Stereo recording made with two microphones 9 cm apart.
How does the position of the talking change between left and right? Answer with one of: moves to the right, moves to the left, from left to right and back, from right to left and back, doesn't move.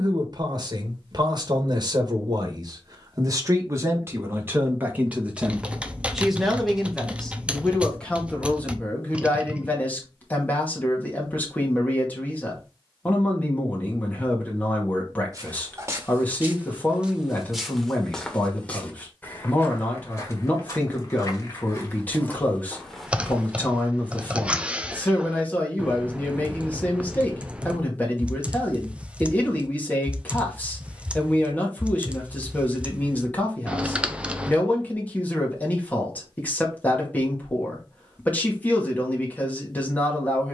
moves to the left.